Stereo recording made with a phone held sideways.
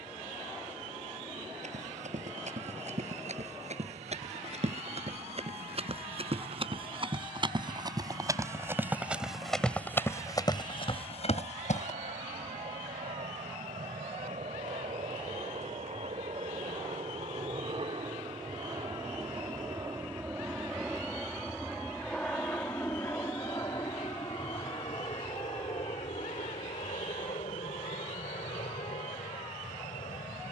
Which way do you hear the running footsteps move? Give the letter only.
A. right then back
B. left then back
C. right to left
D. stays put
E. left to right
C.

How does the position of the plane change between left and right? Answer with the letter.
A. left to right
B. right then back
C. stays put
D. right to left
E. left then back
D.